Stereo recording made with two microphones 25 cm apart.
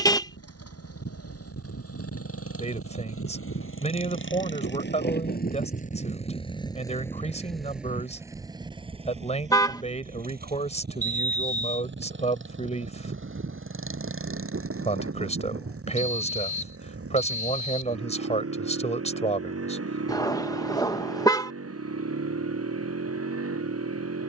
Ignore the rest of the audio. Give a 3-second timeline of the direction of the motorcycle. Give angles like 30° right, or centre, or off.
70° left, 50° left, centre, 40° right, 50° right, 60° right, 70° right, 70° right.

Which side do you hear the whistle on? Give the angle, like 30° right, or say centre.
30° left.